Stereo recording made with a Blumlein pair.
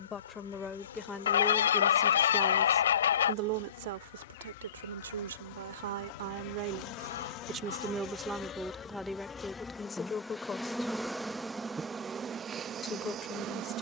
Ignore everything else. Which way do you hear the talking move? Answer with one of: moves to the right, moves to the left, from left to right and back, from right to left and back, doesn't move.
from left to right and back.